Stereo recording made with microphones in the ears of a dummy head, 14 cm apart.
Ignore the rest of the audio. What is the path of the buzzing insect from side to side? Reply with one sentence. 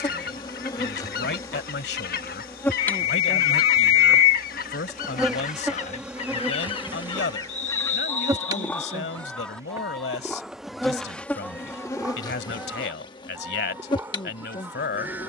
In this clip you hear the buzzing insect move from left to right and back again.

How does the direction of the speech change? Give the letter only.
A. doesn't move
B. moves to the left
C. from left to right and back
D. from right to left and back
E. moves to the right
A.